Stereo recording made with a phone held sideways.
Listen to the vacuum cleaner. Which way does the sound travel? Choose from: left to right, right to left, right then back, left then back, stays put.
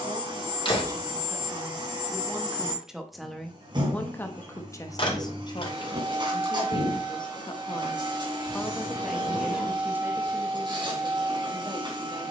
stays put.